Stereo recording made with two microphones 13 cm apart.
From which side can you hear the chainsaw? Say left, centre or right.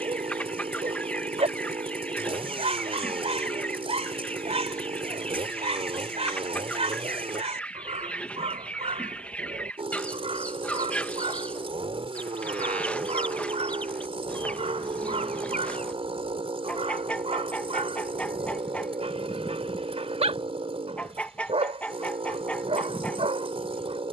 right.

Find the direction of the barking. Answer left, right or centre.
right.